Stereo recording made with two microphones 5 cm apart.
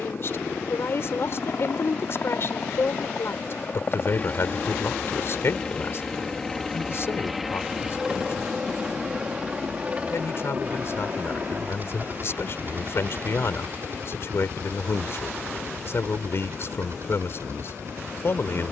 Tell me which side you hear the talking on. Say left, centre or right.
left.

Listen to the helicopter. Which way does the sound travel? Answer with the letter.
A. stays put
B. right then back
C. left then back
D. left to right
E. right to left
D.